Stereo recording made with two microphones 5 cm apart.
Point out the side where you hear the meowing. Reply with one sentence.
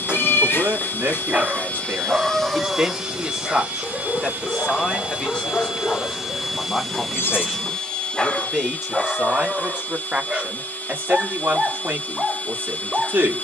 In this clip you hear the meowing on the left.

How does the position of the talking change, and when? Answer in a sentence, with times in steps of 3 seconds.
You can hear the talking on the right from 0 s, in the centre from 3 s and on the right from 9 s.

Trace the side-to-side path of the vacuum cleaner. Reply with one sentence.
In this clip you hear the vacuum cleaner move from left to right and back again.